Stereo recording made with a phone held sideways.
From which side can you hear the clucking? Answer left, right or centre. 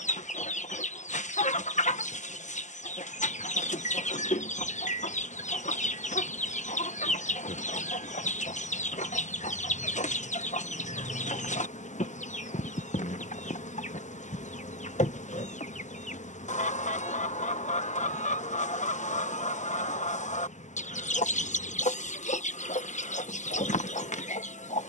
left.